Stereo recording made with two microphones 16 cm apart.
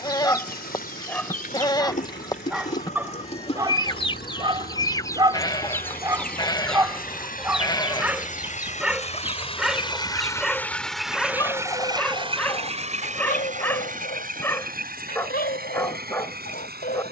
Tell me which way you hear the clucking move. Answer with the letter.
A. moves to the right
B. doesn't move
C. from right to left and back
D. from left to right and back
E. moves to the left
D.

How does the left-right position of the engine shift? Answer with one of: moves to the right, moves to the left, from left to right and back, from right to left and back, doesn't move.
moves to the right.